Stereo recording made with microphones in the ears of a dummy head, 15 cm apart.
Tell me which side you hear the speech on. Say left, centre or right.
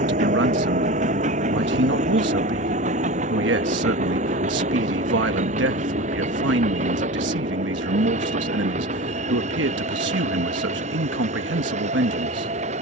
right.